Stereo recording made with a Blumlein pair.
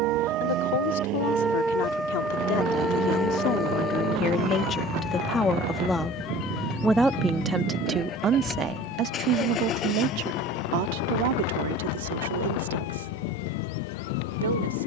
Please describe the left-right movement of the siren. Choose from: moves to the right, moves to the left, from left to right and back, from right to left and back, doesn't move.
moves to the left.